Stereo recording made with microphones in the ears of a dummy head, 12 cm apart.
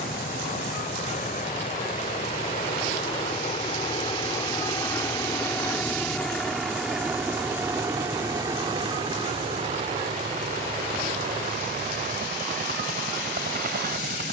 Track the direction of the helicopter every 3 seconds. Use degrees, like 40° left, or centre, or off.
50° left, 30° left, 10° right, 40° right, 60° right.